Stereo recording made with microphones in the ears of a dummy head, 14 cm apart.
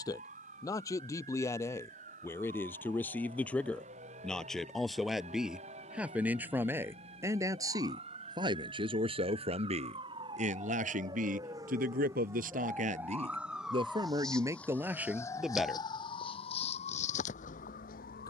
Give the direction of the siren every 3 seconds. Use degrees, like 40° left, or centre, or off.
50° right, 50° right, 40° right, 30° right, 10° right, 40° left.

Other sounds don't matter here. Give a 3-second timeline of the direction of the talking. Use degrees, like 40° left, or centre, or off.
20° left, centre, 20° right, 50° right, 40° right, centre.